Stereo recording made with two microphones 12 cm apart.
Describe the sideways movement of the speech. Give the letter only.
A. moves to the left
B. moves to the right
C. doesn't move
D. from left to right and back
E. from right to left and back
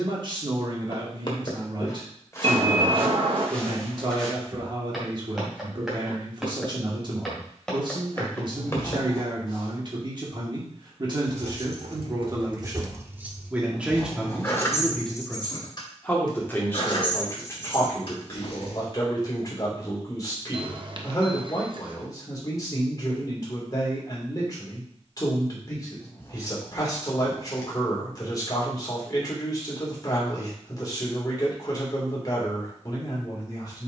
A.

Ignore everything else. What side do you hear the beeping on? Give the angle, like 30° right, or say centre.
40° right.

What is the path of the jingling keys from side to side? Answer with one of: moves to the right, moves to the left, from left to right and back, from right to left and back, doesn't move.
moves to the left.